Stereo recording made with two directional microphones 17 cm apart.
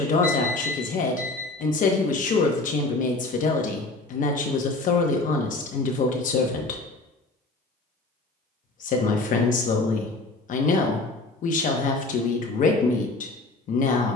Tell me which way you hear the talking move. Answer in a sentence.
You can hear the talking stay in one place.